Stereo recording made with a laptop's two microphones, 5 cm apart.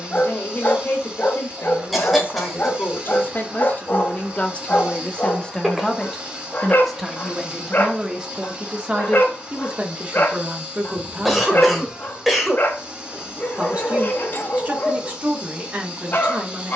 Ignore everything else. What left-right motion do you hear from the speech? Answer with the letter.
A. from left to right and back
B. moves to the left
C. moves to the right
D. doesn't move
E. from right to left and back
C.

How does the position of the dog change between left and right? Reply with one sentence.
You can hear the dog stay in one place.